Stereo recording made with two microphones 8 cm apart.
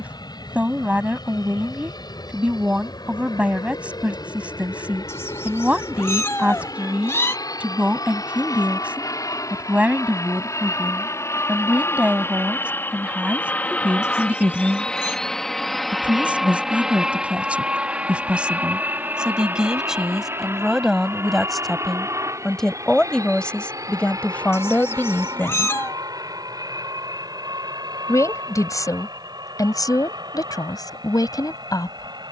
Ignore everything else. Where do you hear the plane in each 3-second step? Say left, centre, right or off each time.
left, left, left, left, left, centre, right, right, right, right, right.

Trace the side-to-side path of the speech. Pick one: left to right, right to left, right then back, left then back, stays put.
right to left.